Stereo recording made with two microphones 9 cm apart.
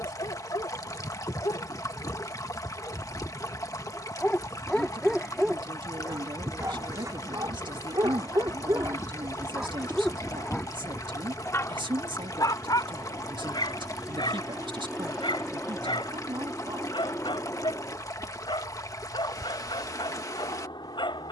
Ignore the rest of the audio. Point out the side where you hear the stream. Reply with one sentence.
You can hear the stream on the left.